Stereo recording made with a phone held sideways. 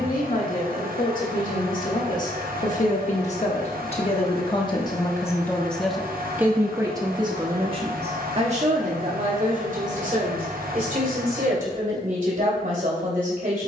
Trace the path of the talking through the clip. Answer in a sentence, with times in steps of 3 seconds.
You can hear the talking on the left from 0 s and on the right from 6 s.